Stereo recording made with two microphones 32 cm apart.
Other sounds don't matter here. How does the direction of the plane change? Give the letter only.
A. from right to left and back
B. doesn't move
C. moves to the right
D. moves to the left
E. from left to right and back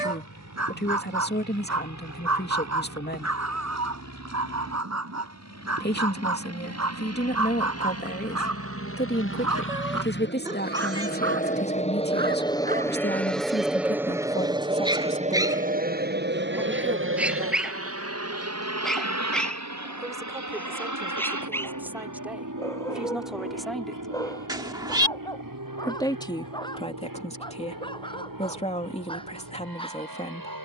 C.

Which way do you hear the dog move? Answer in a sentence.
In this clip you hear the dog travel towards the left.